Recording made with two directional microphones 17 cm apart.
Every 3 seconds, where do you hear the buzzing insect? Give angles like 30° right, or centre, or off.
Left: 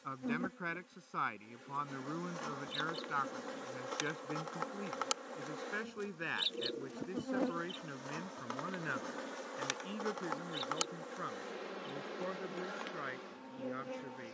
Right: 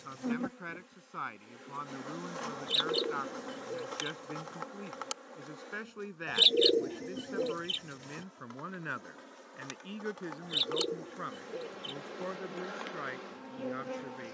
20° right, 10° left, 40° left, 30° left, 10° right.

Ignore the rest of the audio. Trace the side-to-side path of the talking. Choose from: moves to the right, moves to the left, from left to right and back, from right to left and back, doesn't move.
moves to the right.